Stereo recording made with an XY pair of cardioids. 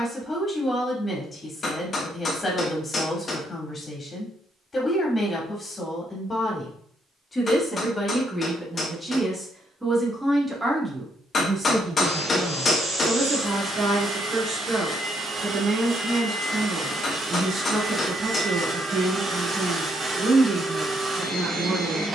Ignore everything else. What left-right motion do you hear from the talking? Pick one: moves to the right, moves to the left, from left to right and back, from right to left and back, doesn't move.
moves to the right.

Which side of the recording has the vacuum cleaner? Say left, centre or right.
right.